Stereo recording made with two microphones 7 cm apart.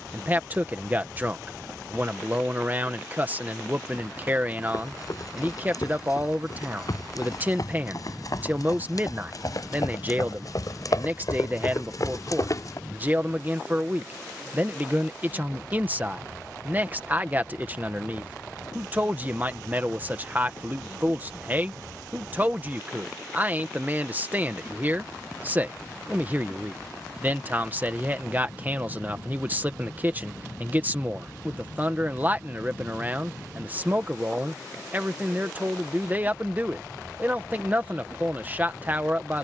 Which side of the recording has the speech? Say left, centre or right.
right.